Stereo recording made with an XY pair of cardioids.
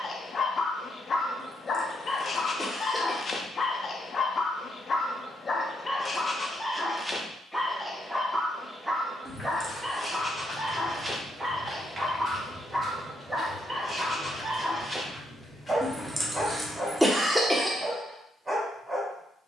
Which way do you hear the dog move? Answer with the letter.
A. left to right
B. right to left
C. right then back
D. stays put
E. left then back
A.